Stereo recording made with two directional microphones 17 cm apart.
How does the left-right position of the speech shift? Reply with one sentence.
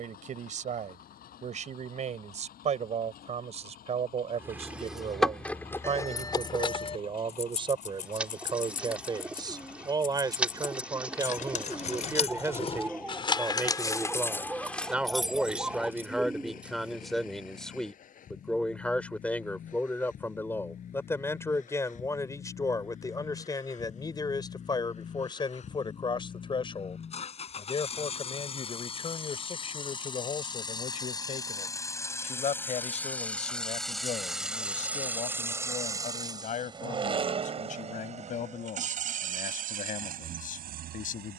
In this clip you hear the speech move from right to left.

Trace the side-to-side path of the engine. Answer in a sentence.
In this clip you hear the engine move from left to right.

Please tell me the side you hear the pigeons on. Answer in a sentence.
You can hear the pigeons in the centre.